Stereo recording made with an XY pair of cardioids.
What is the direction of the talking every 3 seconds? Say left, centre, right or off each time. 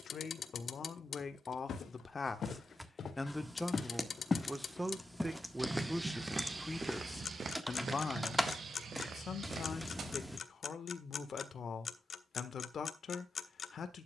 left, centre, left, left, left.